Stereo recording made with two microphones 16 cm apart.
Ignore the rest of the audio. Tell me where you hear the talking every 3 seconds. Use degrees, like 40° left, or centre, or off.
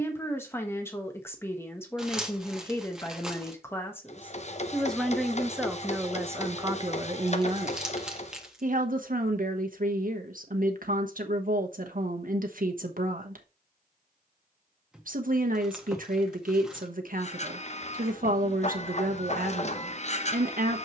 20° left, 10° left, 30° right, 60° right, 60° right, 60° right, 60° right.